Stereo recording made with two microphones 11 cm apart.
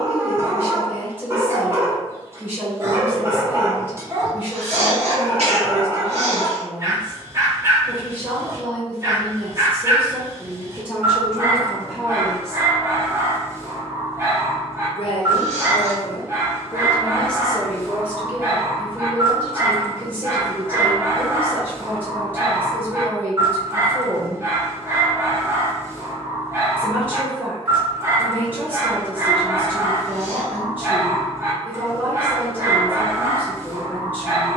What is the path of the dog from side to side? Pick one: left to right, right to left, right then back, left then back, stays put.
stays put.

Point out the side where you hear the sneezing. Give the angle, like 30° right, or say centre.
70° right.